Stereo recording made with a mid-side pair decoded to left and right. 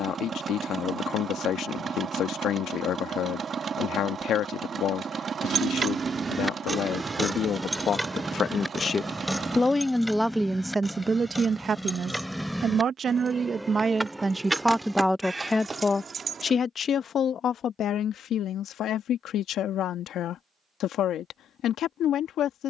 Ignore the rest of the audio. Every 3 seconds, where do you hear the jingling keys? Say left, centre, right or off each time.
off, right, centre, centre, centre, right, off, off.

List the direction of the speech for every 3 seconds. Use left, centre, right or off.
left, left, left, centre, right, left, left, left.